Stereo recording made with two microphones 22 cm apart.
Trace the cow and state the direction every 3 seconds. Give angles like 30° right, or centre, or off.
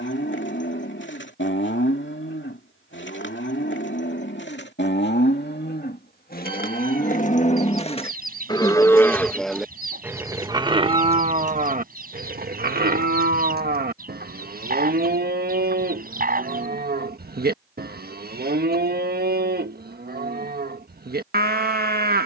60° left, 60° left, 30° left, 20° right, 50° right, 50° right, 50° right, 50° right.